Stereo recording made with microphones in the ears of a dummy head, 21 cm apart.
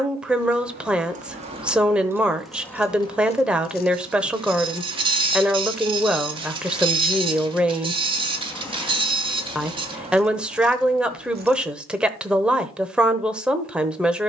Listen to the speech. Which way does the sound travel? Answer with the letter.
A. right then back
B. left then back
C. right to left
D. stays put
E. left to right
D.